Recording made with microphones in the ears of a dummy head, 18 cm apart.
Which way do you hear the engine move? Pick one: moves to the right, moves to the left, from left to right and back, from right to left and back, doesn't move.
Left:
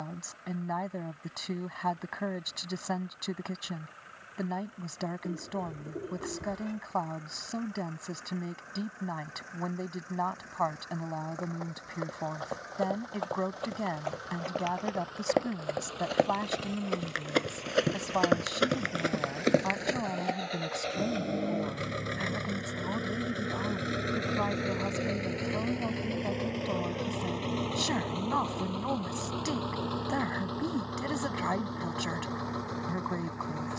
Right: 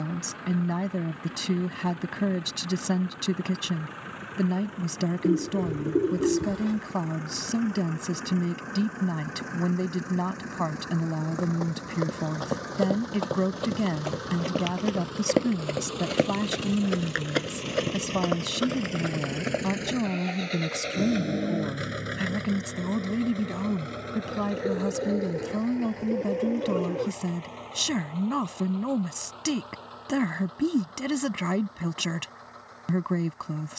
moves to the left.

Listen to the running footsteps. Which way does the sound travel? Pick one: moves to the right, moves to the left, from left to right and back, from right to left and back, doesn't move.
moves to the left.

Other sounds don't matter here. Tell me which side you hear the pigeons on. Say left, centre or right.
right.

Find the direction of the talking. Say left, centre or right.
right.